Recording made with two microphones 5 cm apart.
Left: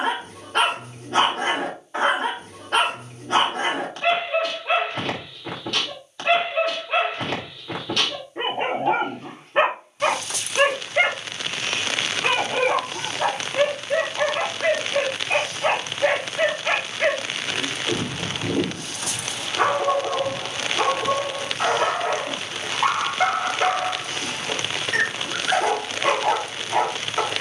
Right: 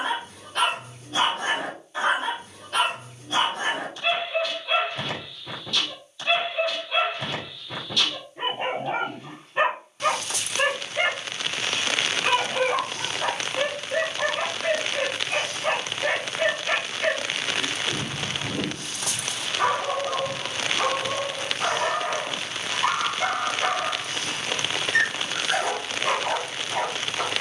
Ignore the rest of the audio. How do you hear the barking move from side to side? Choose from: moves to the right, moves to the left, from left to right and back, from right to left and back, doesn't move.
doesn't move.